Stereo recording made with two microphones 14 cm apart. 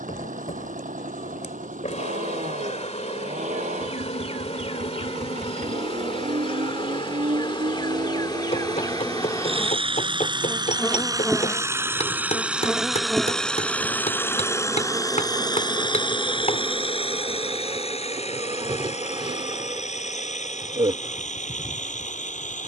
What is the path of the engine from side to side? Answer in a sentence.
You can hear the engine move from right to left.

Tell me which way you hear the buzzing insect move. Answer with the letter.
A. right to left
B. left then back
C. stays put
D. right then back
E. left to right
E.